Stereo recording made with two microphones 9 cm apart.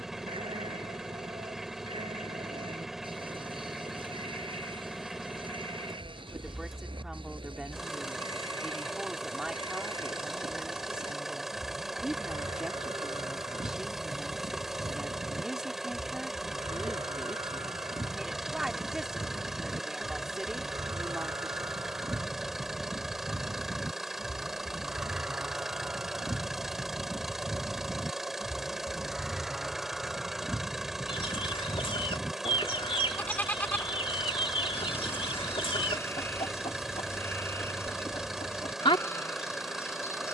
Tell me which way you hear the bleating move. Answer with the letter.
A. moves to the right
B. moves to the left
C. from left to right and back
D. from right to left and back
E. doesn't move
B.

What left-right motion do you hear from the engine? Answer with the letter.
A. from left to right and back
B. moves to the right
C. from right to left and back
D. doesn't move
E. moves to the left
D.